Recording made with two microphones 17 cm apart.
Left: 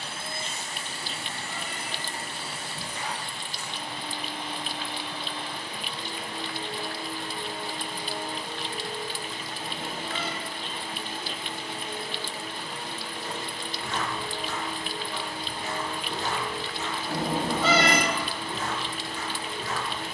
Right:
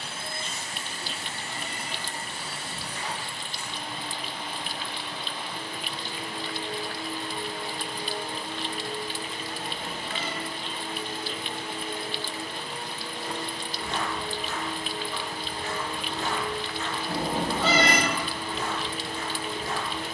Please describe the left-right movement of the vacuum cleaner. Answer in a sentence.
You can hear the vacuum cleaner travel towards the right.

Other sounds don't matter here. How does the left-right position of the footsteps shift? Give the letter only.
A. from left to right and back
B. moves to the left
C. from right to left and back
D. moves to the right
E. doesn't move
C.